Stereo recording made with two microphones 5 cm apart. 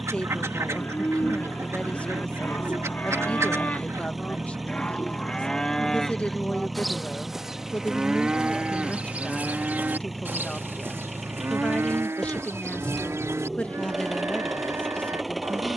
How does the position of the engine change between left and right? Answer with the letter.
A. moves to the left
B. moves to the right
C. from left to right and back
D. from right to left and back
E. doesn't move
E.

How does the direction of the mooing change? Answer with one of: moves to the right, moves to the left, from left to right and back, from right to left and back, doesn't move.
moves to the right.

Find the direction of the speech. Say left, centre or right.
left.